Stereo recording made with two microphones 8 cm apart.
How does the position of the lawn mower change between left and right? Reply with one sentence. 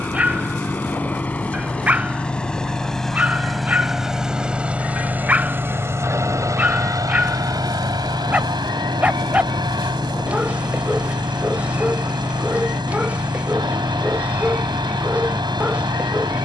You can hear the lawn mower travel towards the right.